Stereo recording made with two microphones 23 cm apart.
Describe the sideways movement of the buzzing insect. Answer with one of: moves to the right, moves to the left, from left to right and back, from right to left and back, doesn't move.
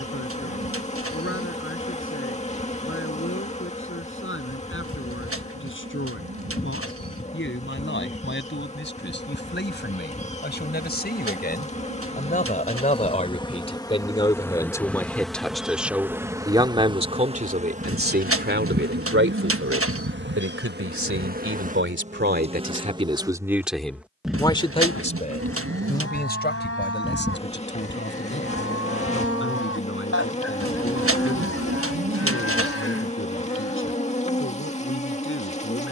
from left to right and back.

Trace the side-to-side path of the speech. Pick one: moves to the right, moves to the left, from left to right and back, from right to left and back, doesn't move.
from left to right and back.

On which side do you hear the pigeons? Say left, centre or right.
right.